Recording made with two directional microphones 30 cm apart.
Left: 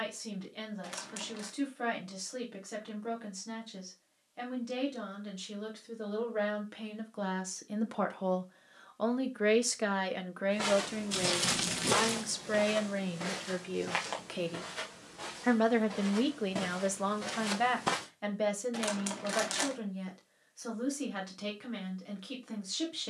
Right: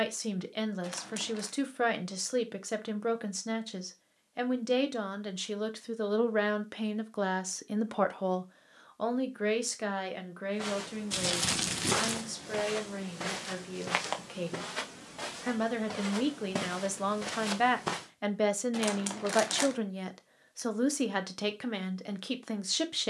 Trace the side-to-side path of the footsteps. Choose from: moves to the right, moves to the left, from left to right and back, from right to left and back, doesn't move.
from left to right and back.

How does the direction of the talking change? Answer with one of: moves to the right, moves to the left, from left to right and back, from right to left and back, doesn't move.
from right to left and back.